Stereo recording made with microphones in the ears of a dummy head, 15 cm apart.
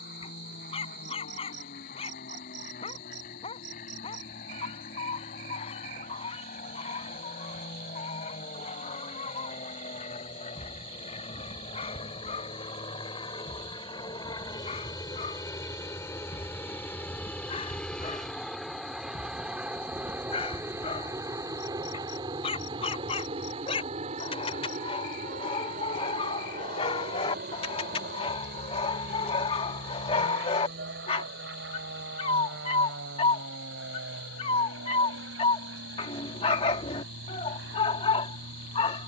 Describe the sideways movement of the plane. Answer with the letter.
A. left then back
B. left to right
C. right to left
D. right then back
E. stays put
B.